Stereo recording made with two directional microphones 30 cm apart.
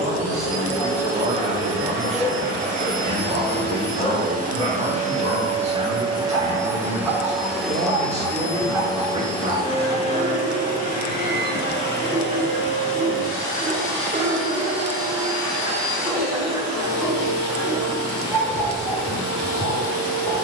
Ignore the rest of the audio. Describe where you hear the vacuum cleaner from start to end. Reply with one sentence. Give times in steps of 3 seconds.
In this clip you hear the vacuum cleaner on the right from 0 s, in the centre from 6 s and on the left from 9 s.